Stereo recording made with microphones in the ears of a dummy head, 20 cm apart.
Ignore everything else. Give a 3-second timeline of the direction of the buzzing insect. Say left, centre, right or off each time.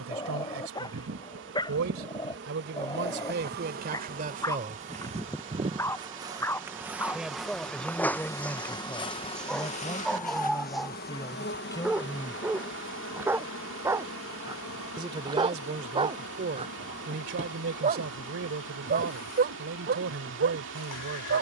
right, right, centre, left, left, left, left.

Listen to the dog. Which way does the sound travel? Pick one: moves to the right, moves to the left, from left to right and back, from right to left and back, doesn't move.
moves to the right.